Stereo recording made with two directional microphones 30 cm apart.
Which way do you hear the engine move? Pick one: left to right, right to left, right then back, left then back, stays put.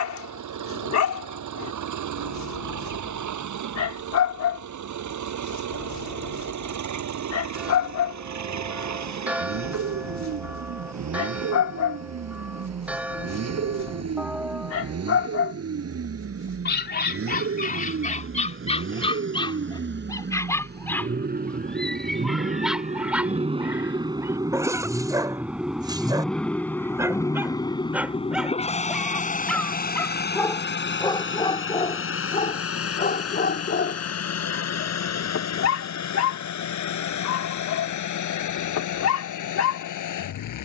right to left.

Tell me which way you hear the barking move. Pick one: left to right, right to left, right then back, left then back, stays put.
right then back.